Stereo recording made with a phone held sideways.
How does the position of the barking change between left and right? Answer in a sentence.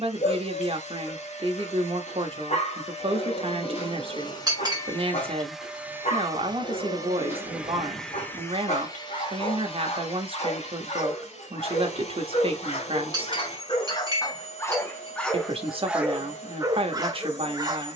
In this clip you hear the barking move to the right.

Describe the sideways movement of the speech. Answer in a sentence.
In this clip you hear the speech stay put.